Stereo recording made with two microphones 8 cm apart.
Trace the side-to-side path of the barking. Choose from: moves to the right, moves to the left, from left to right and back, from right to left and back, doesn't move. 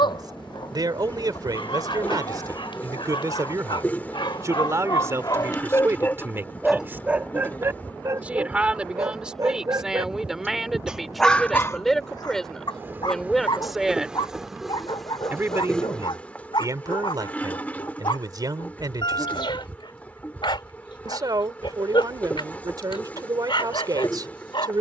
from left to right and back.